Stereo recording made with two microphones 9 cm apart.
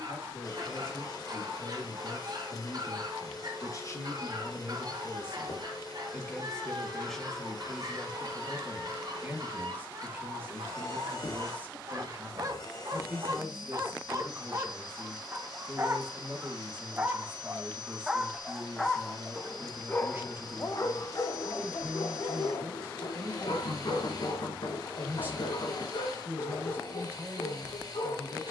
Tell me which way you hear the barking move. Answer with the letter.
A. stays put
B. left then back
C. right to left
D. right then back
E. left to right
C.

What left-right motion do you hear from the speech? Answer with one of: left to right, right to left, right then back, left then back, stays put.
left to right.